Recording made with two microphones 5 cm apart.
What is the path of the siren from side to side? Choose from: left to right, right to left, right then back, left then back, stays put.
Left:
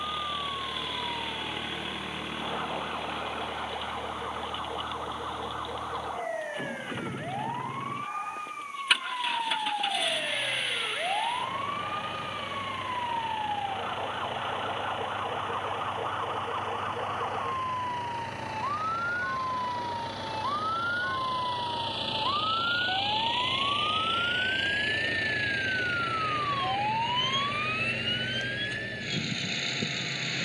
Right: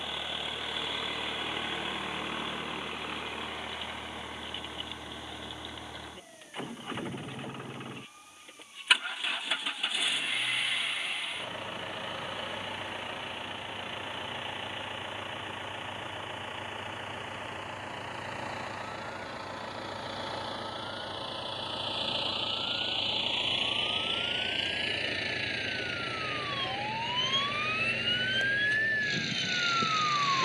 left to right.